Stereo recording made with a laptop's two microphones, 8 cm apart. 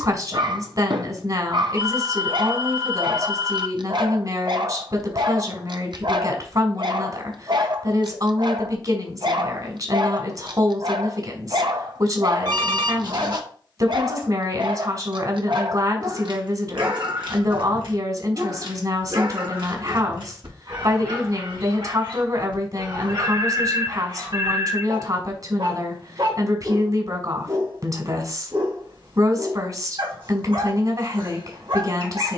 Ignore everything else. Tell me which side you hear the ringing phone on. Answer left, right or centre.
right.